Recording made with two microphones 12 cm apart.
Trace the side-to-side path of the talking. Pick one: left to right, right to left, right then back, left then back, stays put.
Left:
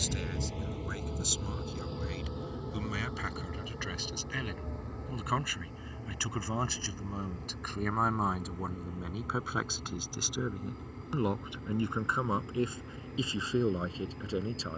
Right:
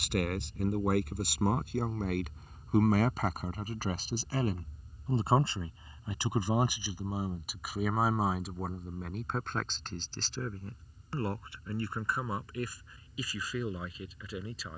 right to left.